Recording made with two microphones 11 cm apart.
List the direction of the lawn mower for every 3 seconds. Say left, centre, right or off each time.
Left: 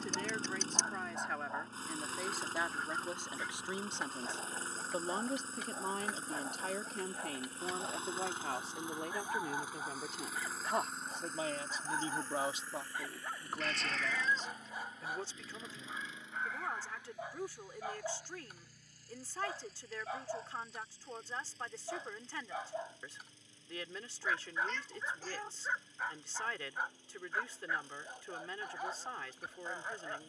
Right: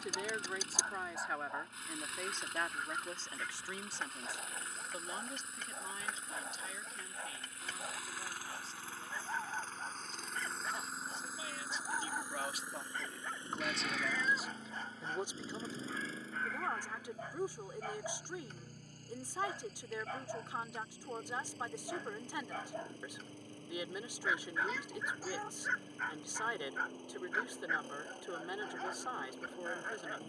left, left, left, centre, right, right, right, right, right, right.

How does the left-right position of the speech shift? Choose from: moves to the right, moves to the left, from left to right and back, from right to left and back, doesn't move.
from right to left and back.